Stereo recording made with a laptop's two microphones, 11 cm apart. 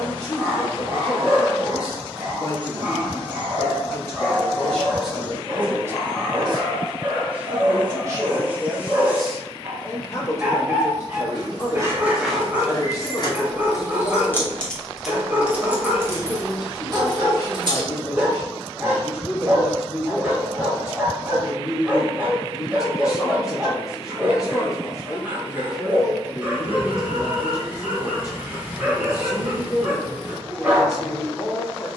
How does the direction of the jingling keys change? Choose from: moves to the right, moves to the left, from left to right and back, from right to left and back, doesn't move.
from right to left and back.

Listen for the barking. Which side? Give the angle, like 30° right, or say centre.
10° right.